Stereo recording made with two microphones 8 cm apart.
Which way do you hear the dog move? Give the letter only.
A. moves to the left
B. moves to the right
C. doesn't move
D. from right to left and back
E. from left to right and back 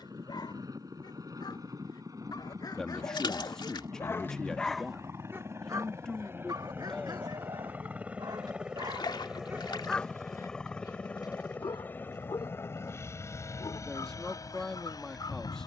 E.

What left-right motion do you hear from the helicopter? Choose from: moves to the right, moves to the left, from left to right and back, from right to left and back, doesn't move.
moves to the left.